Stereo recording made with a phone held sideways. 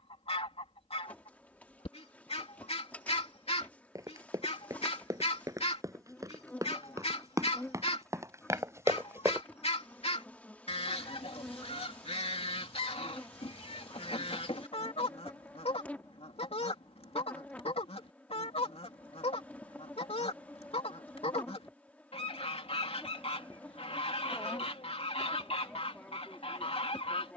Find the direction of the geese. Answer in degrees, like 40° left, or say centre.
50° left.